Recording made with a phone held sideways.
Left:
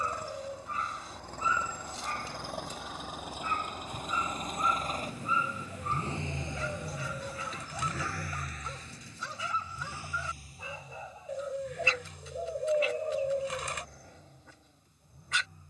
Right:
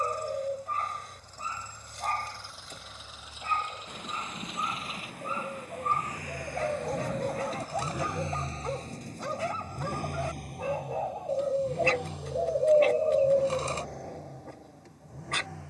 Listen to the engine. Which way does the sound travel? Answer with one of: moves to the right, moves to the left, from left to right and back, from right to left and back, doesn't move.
moves to the right.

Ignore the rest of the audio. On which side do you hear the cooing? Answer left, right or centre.
right.